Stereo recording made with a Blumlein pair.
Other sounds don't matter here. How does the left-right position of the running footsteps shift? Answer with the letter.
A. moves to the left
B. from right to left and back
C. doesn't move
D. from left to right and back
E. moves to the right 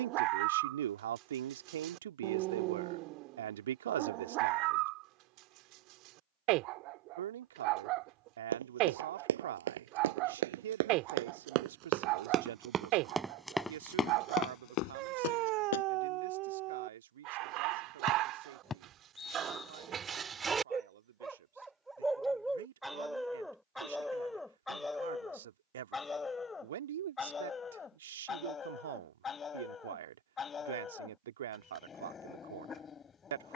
A.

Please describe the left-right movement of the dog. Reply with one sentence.
You can hear the dog travel towards the left.